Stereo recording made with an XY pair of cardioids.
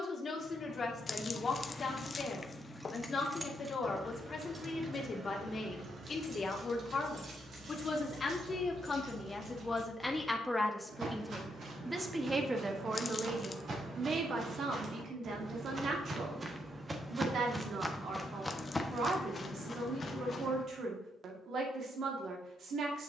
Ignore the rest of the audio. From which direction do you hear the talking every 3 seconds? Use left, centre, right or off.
left, left, left, centre, right, right, right, right.